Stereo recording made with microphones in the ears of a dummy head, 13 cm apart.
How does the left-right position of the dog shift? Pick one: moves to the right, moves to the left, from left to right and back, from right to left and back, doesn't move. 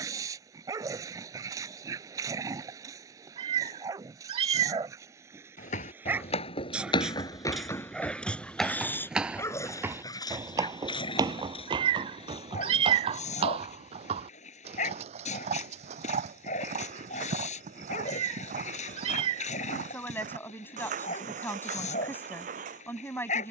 moves to the left.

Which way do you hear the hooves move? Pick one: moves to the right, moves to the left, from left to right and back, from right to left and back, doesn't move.
moves to the right.